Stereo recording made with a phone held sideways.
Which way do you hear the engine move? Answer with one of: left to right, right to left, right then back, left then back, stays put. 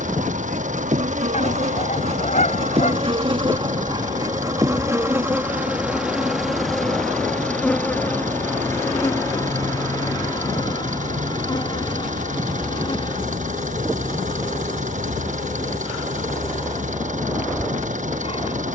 stays put.